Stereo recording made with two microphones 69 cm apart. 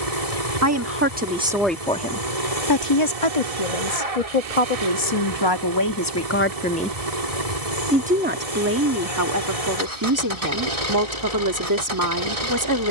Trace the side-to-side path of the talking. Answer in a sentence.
You can hear the talking move from right to left and back again.